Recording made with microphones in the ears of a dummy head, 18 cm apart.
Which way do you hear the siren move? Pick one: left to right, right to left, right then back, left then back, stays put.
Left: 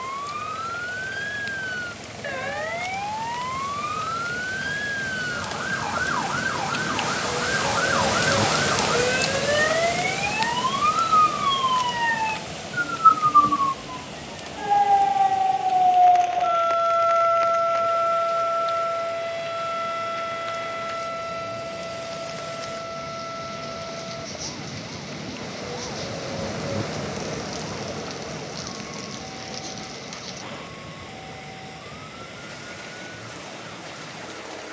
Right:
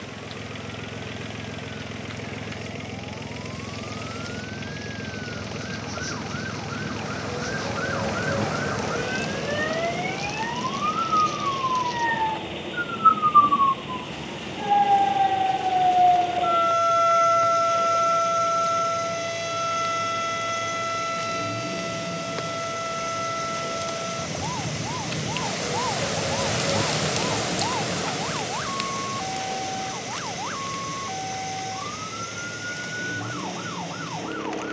left to right.